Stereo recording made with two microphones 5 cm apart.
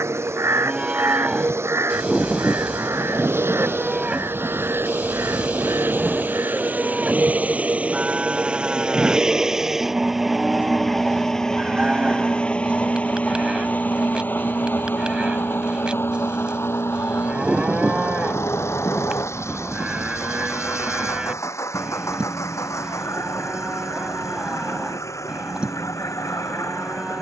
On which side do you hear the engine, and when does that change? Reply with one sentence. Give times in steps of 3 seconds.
You can hear the engine on the right from 0 s, in the centre from 9 s and on the left from 12 s.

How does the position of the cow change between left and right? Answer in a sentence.
In this clip you hear the cow stay put.